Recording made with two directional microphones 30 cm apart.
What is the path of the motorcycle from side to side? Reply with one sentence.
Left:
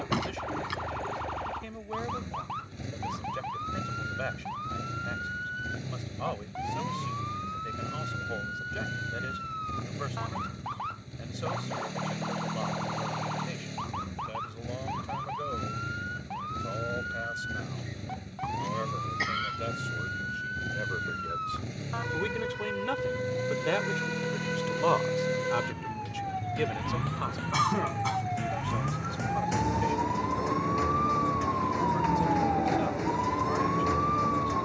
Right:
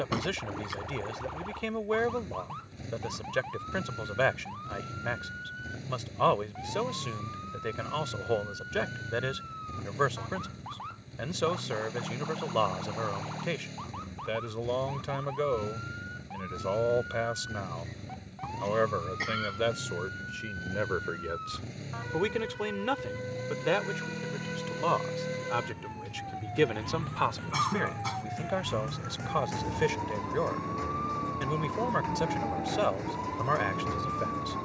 You can hear the motorcycle stay put.